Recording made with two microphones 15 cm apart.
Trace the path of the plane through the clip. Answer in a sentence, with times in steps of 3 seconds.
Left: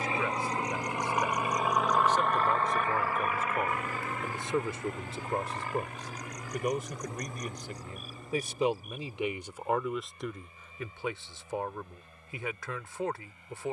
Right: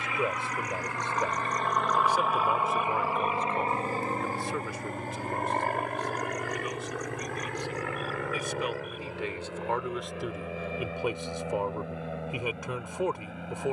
You can hear the plane in the centre from 0 s and on the right from 3 s.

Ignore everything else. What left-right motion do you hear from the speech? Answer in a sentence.
You can hear the speech move from right to left and back again.